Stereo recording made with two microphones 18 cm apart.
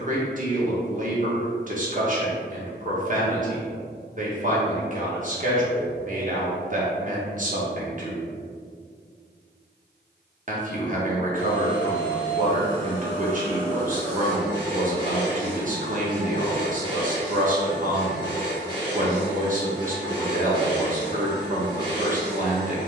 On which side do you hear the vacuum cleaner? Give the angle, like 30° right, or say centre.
20° right.